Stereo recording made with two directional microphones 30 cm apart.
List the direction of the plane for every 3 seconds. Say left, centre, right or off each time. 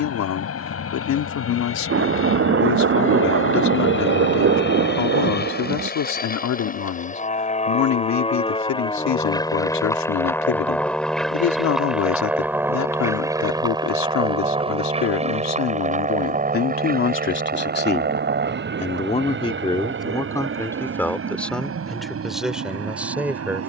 left, left, left, centre, centre, right, right, right.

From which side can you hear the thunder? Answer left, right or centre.
right.